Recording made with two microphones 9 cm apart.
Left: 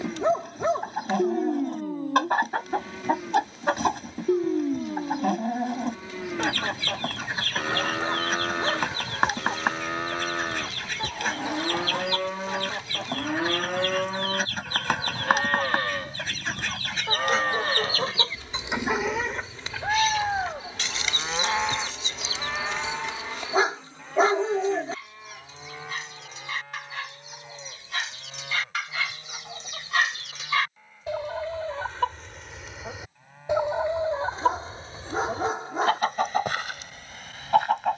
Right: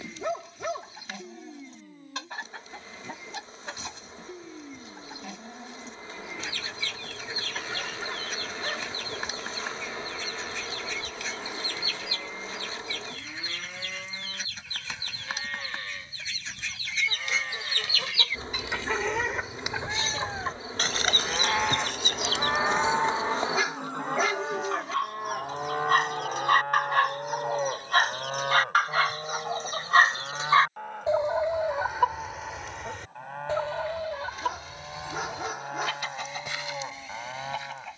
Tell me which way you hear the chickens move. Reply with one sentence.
You can hear the chickens move from left to right and back again.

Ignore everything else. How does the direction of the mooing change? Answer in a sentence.
In this clip you hear the mooing move from left to right.